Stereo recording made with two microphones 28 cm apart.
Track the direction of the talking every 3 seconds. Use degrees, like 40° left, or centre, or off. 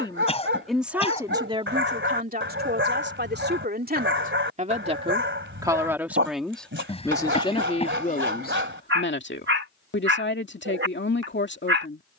20° right, 30° right, 20° left, 40° left.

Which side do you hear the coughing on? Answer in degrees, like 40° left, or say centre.
20° left.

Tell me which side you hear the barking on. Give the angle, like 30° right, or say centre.
40° right.